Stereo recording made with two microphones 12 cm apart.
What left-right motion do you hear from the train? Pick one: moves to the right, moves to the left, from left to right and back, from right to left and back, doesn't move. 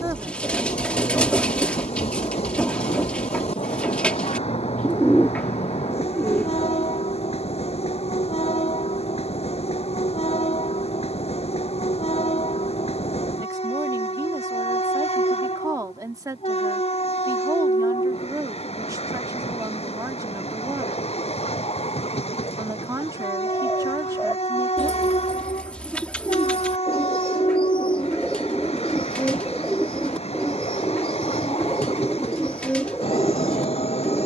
doesn't move.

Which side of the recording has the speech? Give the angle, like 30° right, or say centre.
30° right.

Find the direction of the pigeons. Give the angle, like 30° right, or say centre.
10° left.